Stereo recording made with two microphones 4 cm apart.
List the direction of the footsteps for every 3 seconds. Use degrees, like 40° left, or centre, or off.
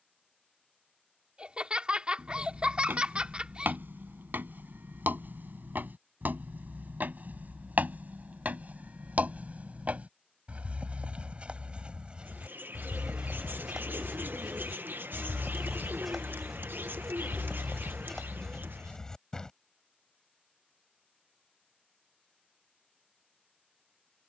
60° right, 60° right, 50° right, 40° right, 20° right, centre, 10° left, off.